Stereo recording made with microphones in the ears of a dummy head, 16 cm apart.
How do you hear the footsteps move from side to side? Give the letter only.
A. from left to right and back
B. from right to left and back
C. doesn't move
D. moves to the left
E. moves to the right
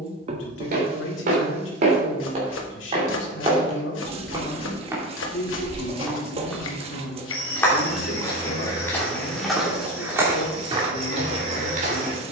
B.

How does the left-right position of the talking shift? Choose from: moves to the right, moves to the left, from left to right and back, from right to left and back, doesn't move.
doesn't move.